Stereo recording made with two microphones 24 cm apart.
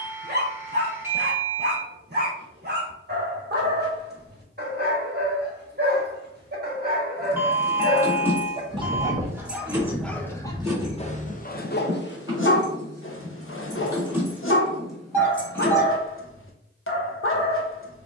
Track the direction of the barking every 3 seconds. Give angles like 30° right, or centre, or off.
40° right, 40° right, 30° right, 10° left, 60° left, 60° left.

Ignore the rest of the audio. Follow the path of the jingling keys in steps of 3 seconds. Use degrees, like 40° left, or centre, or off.
off, off, 10° left, 10° right, 10° right, 10° left.